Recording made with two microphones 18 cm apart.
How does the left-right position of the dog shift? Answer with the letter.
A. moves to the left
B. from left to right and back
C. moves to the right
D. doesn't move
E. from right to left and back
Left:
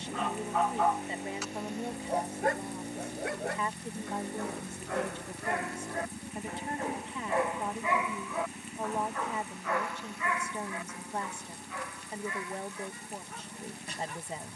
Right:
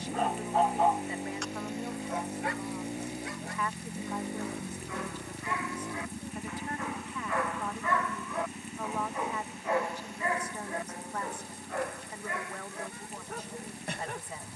E.